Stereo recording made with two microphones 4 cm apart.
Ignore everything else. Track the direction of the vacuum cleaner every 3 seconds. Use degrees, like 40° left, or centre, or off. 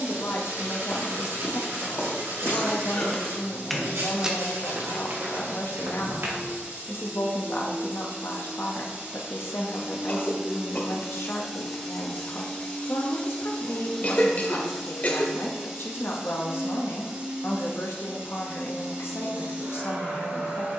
40° right, 40° right, 40° right, 20° right, 10° left, 20° right, 30° right.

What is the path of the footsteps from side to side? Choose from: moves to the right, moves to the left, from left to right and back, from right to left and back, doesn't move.
moves to the right.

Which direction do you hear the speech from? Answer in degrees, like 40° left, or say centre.
60° left.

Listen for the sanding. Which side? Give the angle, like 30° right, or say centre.
80° right.